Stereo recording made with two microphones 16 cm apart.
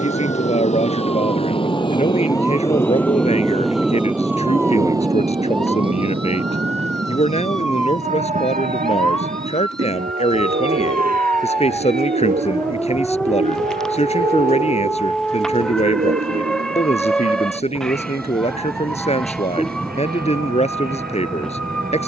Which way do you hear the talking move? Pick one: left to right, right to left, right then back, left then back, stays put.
stays put.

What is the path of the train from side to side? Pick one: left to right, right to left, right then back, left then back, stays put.
left to right.